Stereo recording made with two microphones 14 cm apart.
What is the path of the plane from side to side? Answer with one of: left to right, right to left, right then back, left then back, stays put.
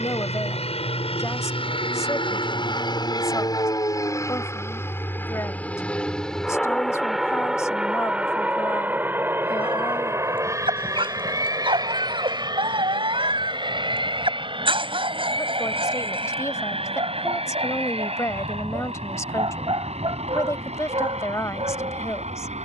left to right.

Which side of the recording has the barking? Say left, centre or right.
right.